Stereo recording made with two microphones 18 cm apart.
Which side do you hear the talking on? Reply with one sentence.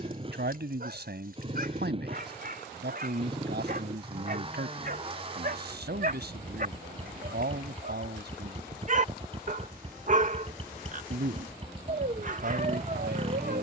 You can hear the talking on the right.